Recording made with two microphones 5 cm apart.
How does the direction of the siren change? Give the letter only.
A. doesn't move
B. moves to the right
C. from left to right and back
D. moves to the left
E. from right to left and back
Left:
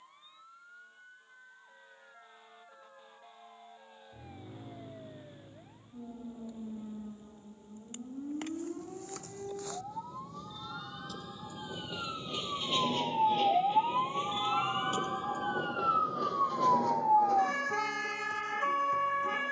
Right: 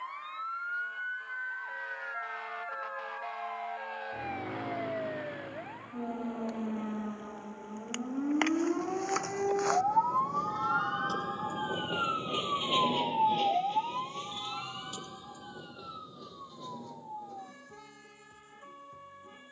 D.